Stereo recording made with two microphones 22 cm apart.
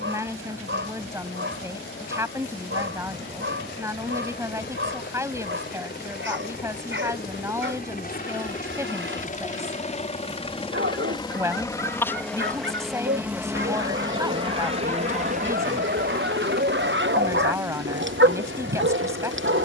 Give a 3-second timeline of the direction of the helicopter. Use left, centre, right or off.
left, left, left, left, centre, right, right.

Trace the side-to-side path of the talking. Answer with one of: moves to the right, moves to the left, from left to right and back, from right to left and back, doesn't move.
doesn't move.